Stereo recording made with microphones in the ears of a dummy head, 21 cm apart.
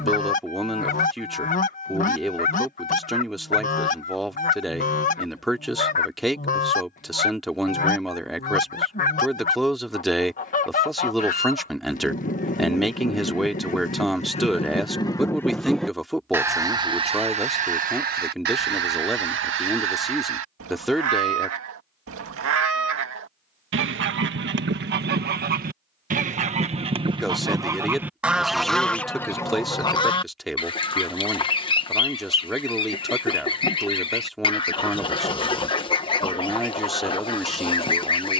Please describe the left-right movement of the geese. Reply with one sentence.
In this clip you hear the geese go right and come back.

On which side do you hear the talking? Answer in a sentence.
In this clip you hear the talking in the centre.